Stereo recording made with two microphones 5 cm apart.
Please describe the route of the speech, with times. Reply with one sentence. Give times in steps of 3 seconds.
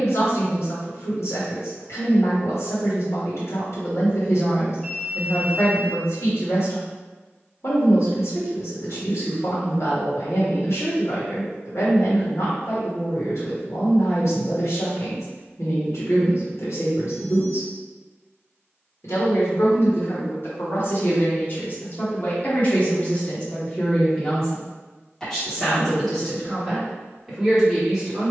You can hear the speech on the left from 0 s and in the centre from 24 s.